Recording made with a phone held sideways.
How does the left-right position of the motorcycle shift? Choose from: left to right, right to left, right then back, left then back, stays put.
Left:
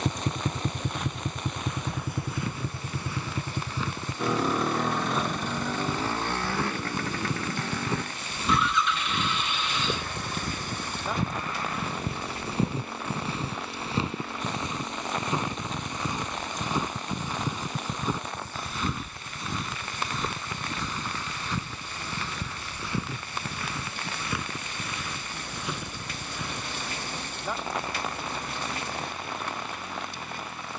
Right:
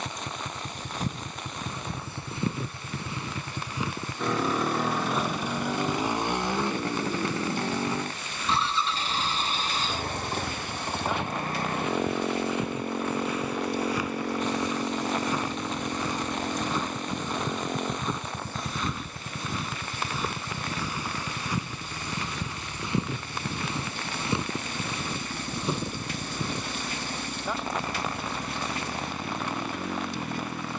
left to right.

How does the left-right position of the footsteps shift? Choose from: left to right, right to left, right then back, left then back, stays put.
left then back.